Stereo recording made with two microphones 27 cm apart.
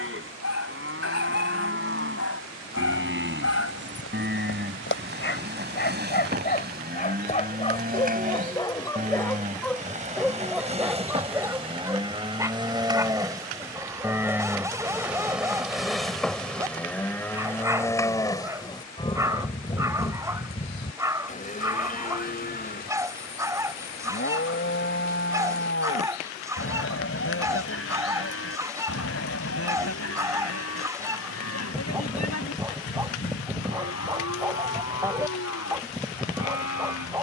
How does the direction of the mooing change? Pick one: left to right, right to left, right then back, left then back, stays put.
right to left.